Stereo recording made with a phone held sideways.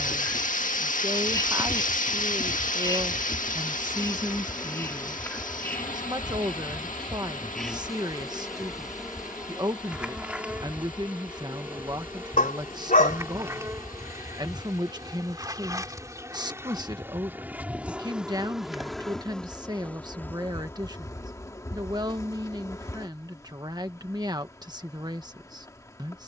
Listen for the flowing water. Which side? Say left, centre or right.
left.